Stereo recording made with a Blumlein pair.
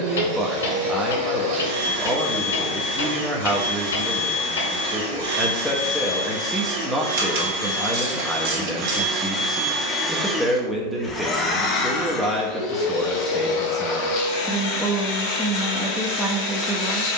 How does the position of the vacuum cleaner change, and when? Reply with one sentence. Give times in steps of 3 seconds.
You can hear the vacuum cleaner on the right from 0 s, in the centre from 9 s and on the left from 12 s.